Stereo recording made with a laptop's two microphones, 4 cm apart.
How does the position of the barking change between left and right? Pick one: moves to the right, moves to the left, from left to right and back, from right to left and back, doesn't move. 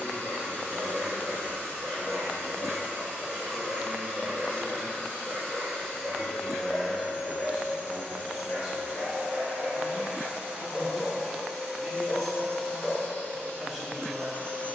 moves to the left.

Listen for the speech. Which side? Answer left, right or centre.
centre.